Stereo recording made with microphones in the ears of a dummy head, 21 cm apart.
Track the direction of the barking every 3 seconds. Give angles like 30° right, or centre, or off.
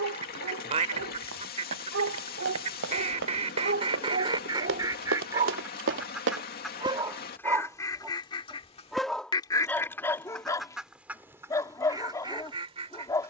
60° right, 40° right, 10° right, 10° left, 10° left.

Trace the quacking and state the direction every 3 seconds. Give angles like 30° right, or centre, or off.
30° right, 20° right, 10° left, centre, 20° right.